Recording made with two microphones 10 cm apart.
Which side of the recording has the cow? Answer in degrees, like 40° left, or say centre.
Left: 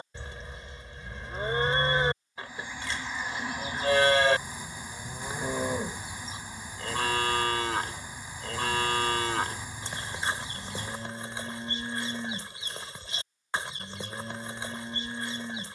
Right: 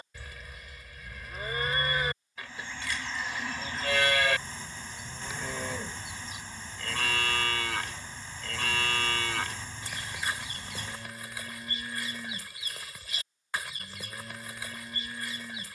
30° left.